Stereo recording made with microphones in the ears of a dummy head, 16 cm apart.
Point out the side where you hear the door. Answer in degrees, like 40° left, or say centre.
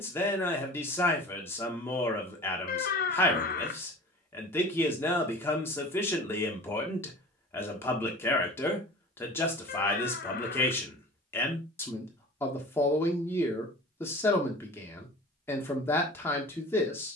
50° left.